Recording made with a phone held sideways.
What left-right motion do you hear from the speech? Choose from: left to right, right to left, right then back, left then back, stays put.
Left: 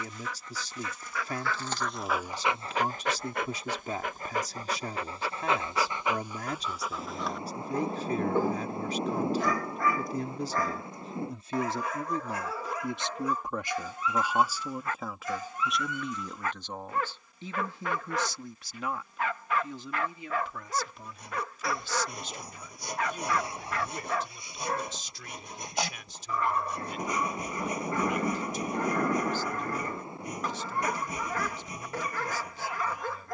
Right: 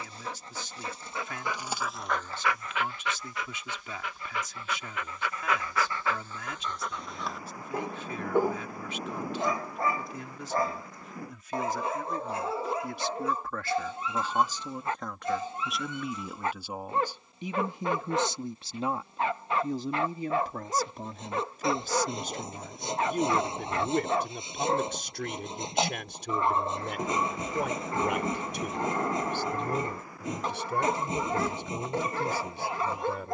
left to right.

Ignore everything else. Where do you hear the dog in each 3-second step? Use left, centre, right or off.
centre, left, centre, right, right, right, right, right, right, right, right.